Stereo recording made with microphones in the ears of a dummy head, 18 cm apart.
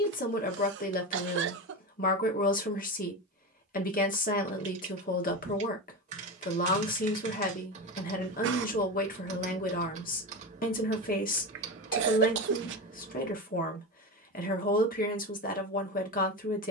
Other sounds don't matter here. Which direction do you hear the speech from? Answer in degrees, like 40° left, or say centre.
40° left.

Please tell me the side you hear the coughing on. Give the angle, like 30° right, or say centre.
60° right.